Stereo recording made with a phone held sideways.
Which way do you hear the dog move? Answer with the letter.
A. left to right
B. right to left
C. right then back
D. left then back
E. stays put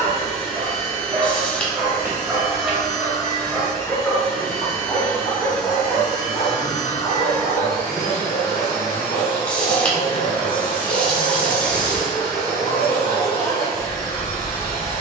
B.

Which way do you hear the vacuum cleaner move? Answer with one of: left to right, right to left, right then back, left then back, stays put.
stays put.